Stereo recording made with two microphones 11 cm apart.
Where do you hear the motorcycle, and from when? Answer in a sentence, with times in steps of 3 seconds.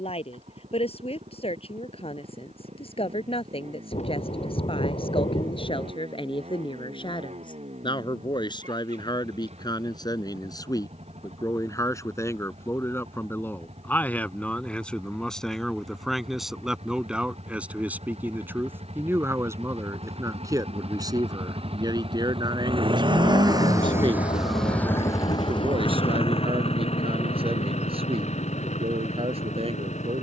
In this clip you hear the motorcycle on the right from 0 s and on the left from 24 s.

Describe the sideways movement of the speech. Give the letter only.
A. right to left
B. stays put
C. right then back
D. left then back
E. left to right
E.